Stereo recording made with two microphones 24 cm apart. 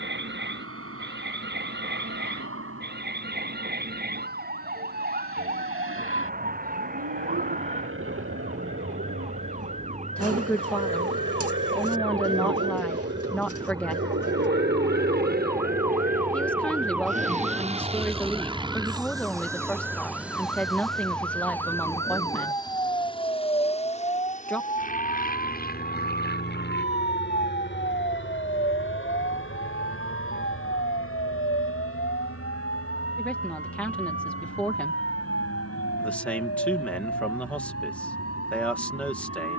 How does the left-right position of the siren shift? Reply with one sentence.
You can hear the siren move to the left.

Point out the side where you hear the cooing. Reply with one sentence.
You can hear the cooing on the right.